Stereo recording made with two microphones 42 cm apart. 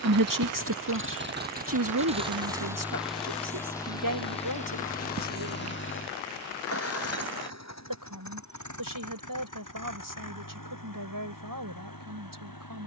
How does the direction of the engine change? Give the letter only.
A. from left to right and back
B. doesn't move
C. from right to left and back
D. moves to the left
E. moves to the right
D.